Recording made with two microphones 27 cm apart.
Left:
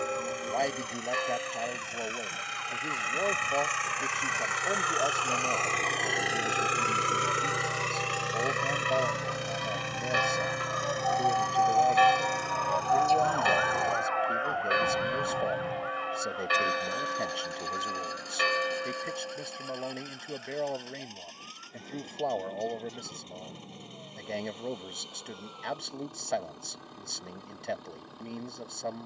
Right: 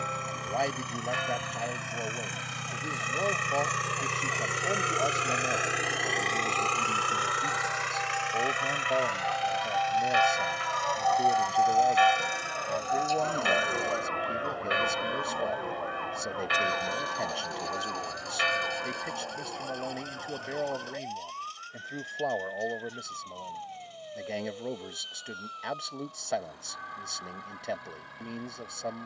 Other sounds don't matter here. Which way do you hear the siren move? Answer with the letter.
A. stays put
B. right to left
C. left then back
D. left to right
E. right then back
D.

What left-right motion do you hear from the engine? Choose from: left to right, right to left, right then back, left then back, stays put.
right to left.